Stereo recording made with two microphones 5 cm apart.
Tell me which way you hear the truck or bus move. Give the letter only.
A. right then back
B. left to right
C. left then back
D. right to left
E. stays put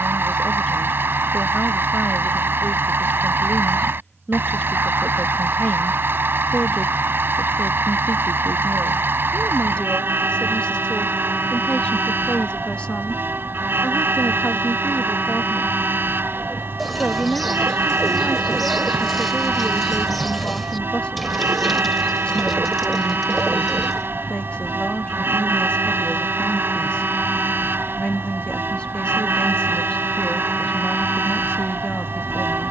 E.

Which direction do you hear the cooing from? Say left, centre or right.
centre.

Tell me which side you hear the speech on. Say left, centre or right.
left.